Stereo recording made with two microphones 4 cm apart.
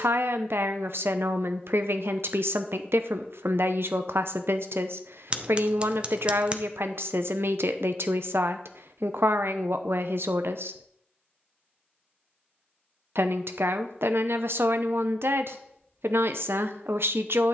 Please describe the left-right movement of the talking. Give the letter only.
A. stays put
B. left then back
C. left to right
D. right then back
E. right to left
A.